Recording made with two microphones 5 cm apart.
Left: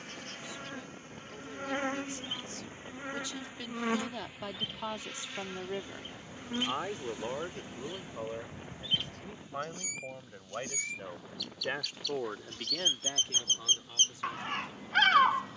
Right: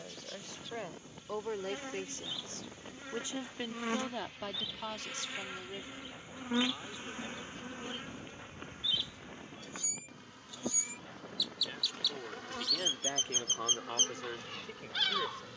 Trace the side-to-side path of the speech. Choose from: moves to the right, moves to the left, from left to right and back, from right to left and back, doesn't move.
from right to left and back.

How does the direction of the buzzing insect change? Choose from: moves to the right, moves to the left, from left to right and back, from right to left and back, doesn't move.
moves to the right.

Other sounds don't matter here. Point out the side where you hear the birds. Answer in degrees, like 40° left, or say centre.
50° left.